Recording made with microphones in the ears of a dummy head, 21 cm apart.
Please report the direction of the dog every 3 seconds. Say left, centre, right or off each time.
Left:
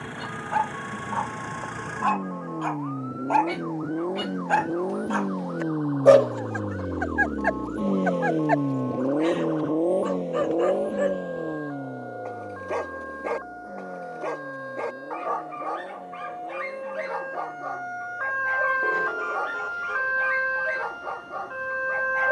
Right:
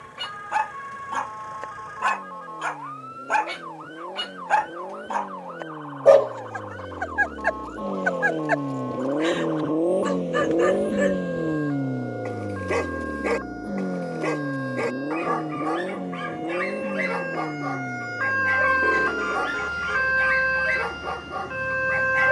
right, centre, centre, right, right, right, right, right.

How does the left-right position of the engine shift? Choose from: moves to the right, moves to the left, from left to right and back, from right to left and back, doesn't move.
moves to the right.